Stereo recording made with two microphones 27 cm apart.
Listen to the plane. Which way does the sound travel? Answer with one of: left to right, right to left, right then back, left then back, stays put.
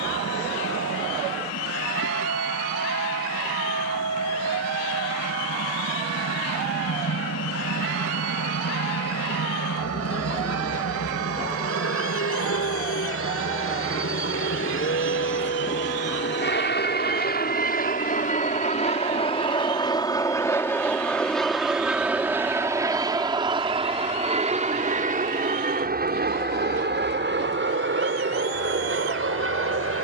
left to right.